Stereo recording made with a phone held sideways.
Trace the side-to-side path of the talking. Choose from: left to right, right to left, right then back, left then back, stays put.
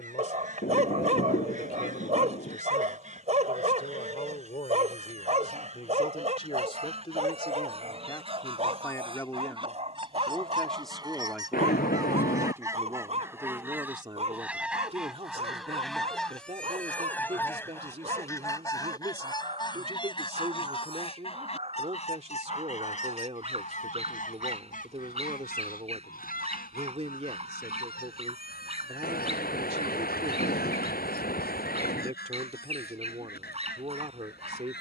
left to right.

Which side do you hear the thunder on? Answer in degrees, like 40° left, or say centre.
60° left.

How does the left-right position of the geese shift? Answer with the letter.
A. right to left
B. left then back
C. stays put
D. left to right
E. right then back
A.